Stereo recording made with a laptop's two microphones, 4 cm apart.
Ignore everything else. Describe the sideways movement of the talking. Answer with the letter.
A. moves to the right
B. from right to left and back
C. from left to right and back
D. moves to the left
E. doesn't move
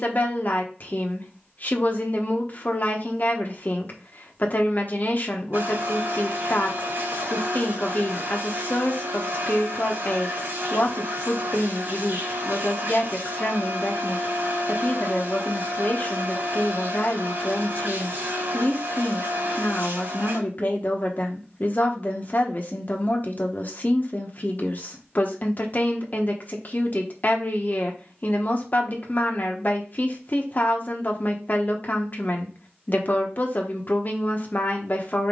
E.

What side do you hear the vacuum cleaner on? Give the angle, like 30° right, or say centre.
60° right.